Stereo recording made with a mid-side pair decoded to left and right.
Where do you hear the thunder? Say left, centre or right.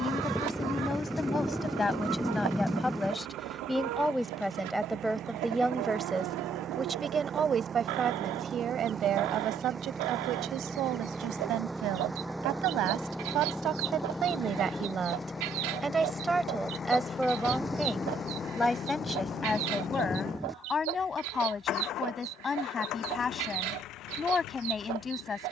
centre.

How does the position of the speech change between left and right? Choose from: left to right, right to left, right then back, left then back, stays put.
right then back.